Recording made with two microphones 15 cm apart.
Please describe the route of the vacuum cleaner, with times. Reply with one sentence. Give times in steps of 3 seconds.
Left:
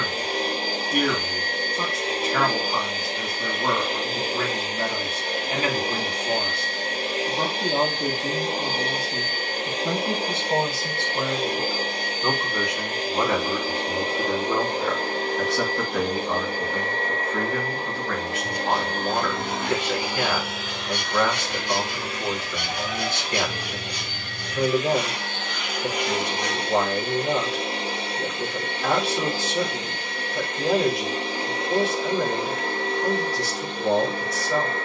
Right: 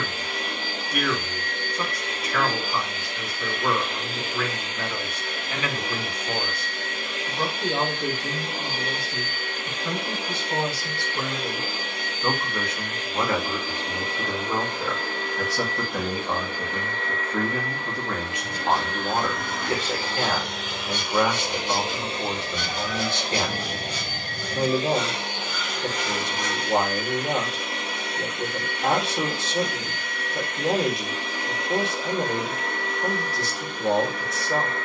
In this clip you hear the vacuum cleaner on the left from 0 s, on the right from 21 s, in the centre from 24 s and on the left from 27 s.